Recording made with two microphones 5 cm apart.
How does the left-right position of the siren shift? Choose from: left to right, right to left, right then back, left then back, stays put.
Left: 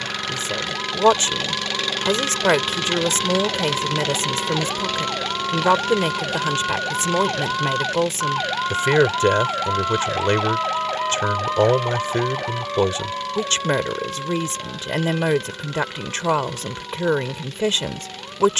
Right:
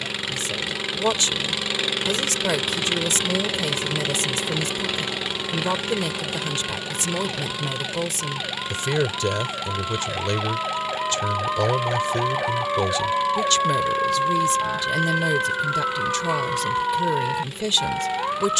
left to right.